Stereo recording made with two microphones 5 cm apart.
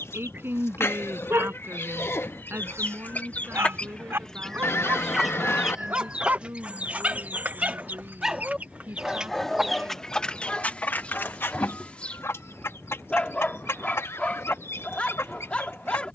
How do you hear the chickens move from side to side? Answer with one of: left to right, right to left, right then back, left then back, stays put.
right then back.